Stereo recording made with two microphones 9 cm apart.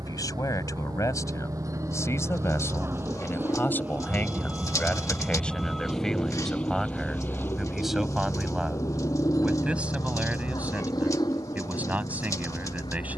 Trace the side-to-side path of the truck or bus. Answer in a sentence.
You can hear the truck or bus move to the left.